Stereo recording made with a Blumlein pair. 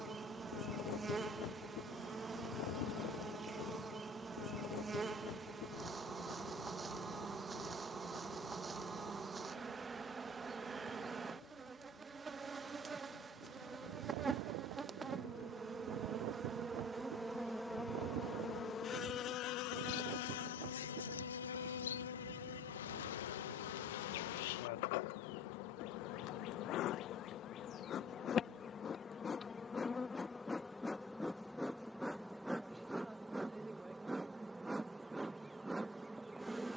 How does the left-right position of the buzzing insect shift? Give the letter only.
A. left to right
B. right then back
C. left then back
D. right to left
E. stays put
C.